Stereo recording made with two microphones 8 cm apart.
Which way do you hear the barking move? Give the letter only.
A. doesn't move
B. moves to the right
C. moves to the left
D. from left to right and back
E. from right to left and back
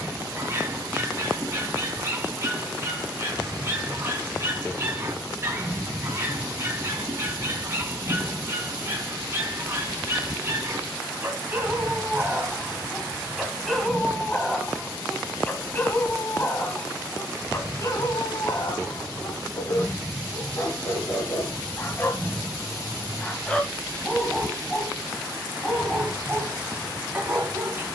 E.